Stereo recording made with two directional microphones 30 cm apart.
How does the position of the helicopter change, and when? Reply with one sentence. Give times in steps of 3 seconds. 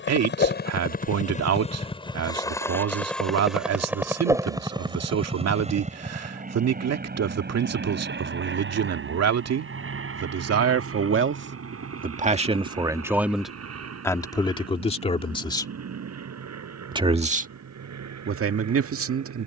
In this clip you hear the helicopter on the left from 0 s, in the centre from 3 s and on the right from 6 s.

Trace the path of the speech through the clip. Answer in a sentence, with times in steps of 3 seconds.
In this clip you hear the speech on the right from 0 s, in the centre from 12 s and on the right from 18 s.